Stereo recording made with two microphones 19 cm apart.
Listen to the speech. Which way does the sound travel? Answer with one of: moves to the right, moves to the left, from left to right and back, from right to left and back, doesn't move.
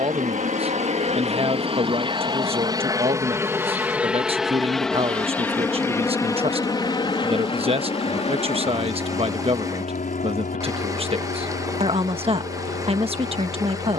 doesn't move.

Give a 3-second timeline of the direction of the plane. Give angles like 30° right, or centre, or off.
30° right, centre, 20° left, 40° left, 50° left.